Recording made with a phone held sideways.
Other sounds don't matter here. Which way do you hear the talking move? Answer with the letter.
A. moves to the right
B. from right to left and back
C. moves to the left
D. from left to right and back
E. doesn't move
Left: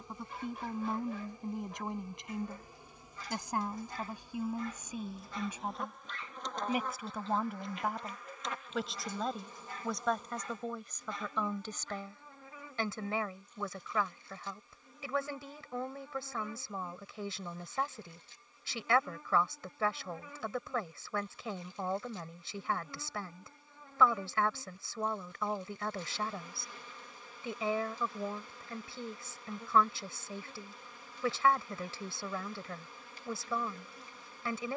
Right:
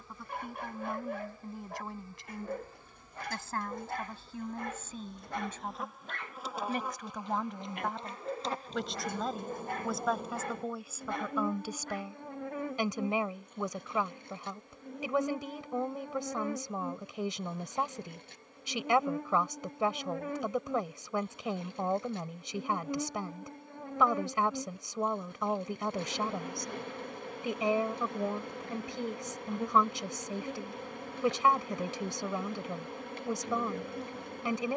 A.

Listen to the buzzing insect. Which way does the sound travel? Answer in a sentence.
You can hear the buzzing insect travel towards the right.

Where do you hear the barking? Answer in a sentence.
You can hear the barking on the right.